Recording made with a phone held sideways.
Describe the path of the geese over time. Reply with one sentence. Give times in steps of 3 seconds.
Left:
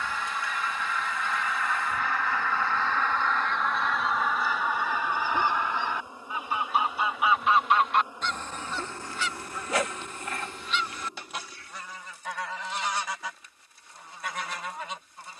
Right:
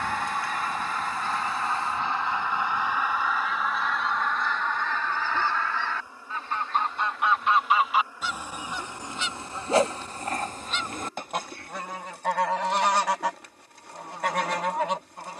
You can hear the geese on the right from 0 s, in the centre from 3 s and on the right from 9 s.